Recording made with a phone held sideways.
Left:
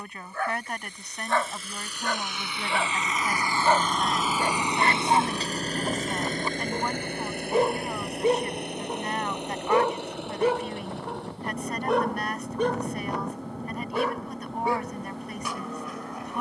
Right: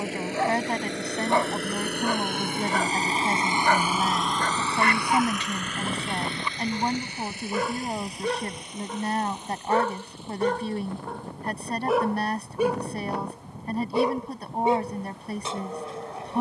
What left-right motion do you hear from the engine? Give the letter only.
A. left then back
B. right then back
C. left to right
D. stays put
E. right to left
E.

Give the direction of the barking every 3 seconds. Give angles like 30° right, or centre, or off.
10° right, 30° left, 30° left, 10° left, 10° right, 30° right.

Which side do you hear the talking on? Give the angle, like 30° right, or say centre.
30° right.